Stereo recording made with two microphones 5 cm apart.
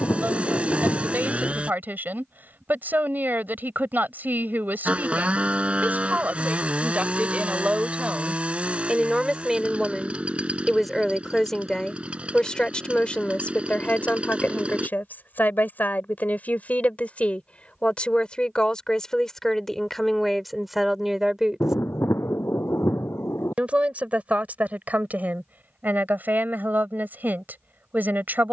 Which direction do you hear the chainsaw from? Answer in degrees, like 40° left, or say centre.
20° right.